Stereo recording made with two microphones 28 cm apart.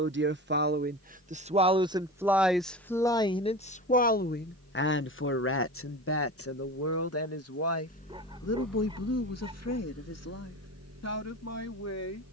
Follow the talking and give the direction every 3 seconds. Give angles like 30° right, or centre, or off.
20° right, 40° left, 70° left, 80° left.